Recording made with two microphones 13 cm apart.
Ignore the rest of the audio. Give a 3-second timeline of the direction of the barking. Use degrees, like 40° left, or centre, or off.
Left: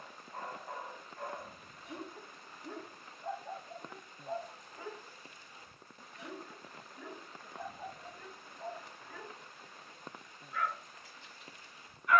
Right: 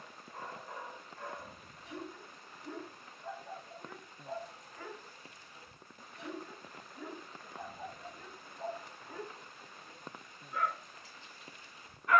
50° left, 20° left, 10° right, 30° right.